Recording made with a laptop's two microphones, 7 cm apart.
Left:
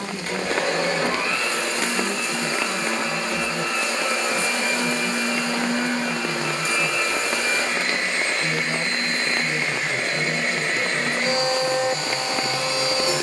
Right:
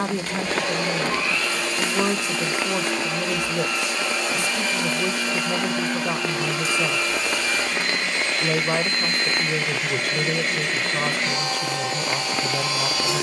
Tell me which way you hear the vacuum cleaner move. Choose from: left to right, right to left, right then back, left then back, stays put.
stays put.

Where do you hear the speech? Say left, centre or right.
right.